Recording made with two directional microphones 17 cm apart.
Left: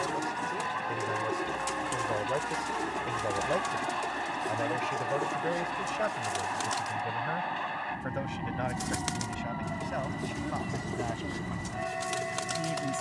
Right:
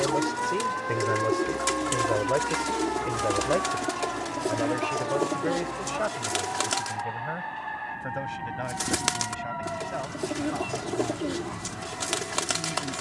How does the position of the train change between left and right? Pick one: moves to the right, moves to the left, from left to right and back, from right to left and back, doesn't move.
doesn't move.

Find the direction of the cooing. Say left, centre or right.
right.